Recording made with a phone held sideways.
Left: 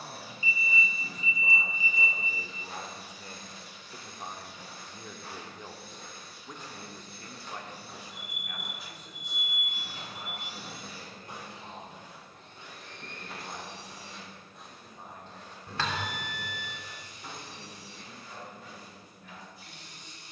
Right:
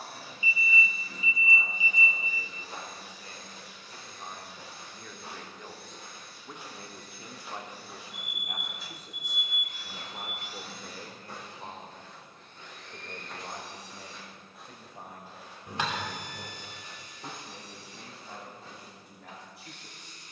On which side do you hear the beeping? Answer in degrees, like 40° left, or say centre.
20° right.